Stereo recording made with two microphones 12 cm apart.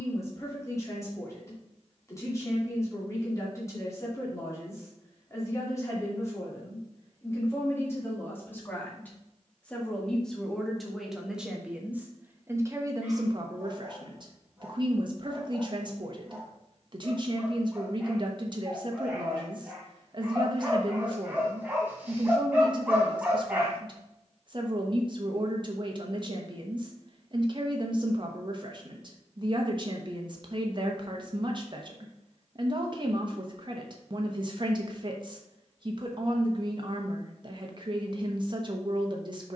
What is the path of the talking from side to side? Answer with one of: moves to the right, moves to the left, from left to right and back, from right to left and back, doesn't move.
moves to the right.